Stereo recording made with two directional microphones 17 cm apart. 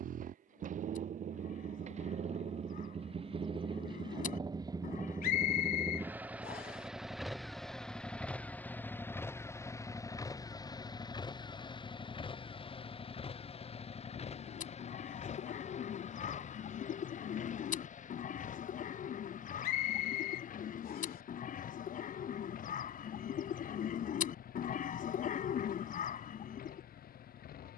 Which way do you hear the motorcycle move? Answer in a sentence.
You can hear the motorcycle move to the left.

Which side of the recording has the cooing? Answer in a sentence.
You can hear the cooing on the left.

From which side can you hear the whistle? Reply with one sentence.
You can hear the whistle on the left.